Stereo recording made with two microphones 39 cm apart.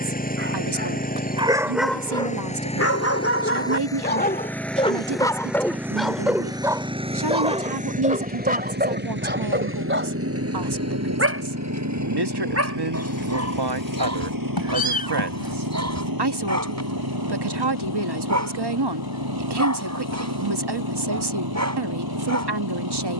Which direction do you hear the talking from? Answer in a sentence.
In this clip you hear the talking on the right.